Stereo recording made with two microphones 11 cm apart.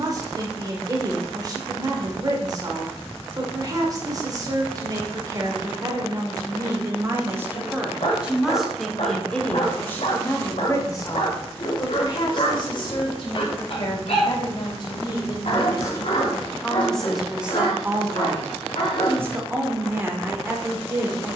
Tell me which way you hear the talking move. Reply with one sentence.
In this clip you hear the talking go left and come back.